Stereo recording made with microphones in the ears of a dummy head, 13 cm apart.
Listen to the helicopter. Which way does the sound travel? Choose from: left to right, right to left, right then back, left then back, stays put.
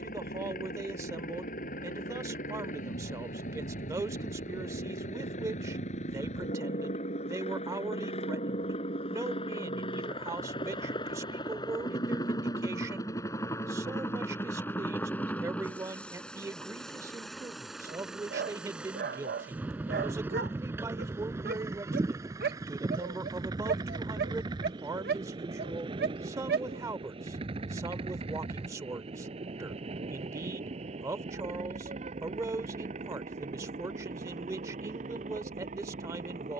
left to right.